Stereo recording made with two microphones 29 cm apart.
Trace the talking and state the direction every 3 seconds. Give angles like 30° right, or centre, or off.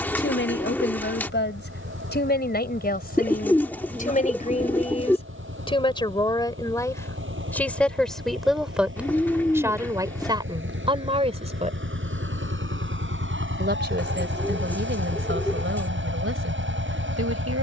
40° left, 30° left, 10° left, 20° right, 40° right, 50° right.